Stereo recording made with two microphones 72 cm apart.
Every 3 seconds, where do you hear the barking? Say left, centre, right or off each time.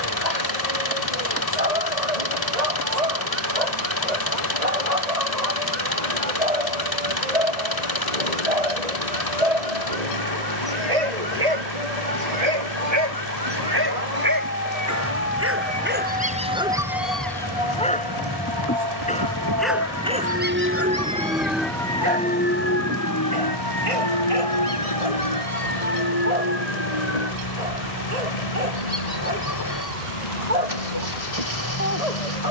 right, right, right, right, right, centre, centre, right, right, right, right.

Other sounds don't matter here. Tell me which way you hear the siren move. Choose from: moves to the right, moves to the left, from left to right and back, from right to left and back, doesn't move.
moves to the left.